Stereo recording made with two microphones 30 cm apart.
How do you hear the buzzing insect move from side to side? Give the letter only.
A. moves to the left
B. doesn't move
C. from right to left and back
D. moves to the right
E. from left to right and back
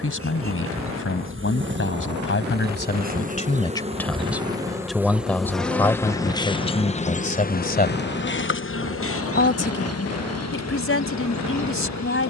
A.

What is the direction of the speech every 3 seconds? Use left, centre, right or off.
left, centre, left, left.